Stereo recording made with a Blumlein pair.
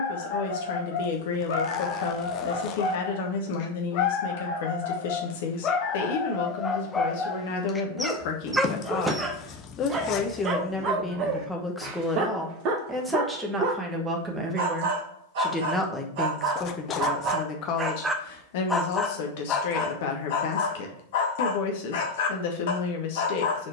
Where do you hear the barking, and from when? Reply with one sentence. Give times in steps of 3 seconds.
In this clip you hear the barking on the left from 0 s, in the centre from 6 s, on the right from 9 s and on the left from 18 s.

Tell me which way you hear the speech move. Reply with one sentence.
In this clip you hear the speech go right and come back.